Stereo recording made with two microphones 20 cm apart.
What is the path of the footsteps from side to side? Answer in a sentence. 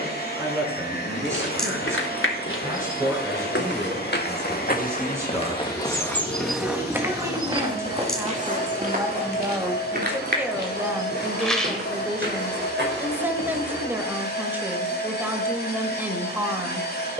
You can hear the footsteps travel towards the right.